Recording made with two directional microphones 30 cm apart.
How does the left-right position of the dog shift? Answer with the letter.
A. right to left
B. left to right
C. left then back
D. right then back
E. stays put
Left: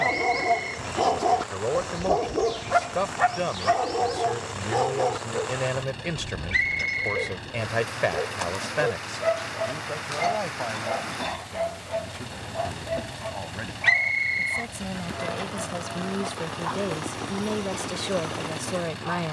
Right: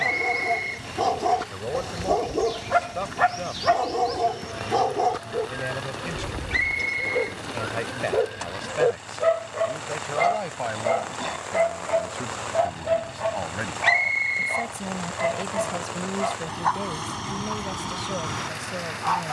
B.